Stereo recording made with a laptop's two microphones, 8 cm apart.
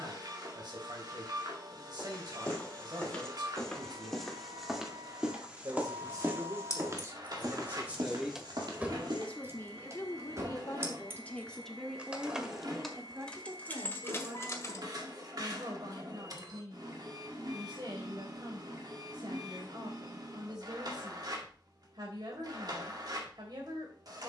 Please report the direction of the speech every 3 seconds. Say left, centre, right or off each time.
right, right, right, left, right, right, right, right.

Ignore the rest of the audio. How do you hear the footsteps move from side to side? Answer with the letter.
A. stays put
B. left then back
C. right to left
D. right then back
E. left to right
E.